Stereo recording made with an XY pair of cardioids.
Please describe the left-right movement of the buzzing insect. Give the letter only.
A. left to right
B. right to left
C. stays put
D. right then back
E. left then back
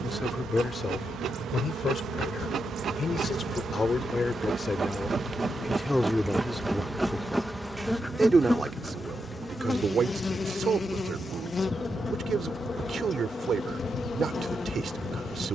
B.